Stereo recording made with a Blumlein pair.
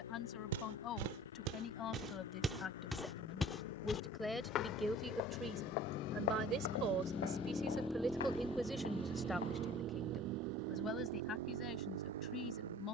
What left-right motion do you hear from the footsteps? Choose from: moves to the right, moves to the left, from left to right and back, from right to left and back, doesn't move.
moves to the left.